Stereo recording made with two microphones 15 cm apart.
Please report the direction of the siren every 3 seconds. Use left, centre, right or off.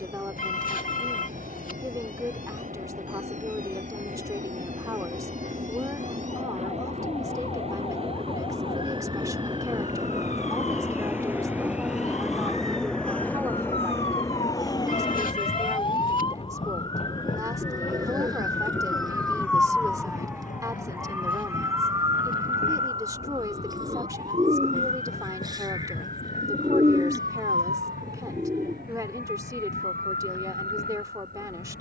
left, left, left, left, left, left, centre, right, right, right, right.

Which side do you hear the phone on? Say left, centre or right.
left.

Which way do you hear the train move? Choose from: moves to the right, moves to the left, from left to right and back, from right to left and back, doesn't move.
moves to the left.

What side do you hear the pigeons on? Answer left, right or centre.
right.